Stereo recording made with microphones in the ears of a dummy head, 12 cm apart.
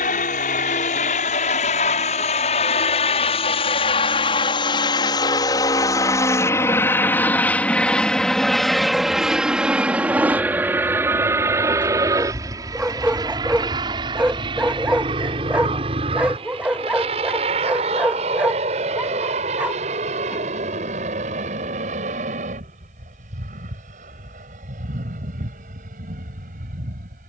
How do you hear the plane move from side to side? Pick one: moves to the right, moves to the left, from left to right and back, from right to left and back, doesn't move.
moves to the right.